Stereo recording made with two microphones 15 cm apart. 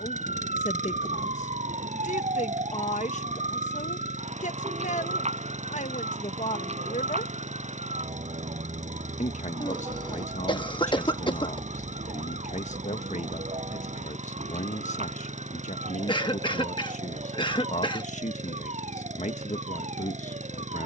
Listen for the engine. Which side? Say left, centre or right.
right.